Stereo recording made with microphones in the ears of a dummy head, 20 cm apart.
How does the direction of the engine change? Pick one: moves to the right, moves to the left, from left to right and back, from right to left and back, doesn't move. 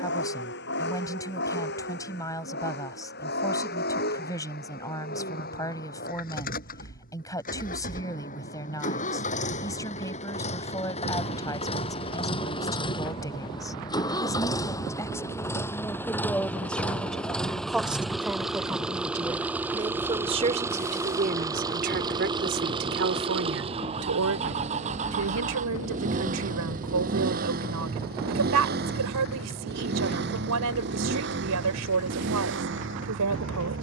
moves to the right.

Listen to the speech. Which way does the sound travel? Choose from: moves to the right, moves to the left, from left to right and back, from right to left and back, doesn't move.
moves to the right.